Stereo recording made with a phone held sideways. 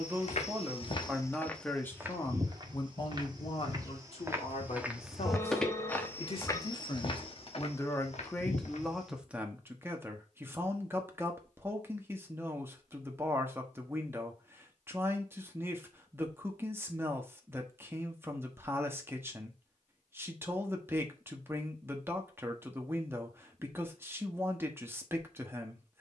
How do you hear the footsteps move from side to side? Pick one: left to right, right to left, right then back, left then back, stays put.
right then back.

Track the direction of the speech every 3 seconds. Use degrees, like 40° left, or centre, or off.
10° left, 50° left, 30° left, 20° right, 20° right, 20° right, 20° right, 20° right, 20° right.